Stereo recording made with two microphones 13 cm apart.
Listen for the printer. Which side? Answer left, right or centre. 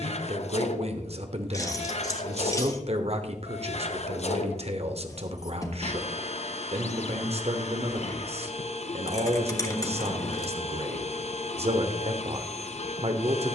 left.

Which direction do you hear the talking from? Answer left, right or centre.
right.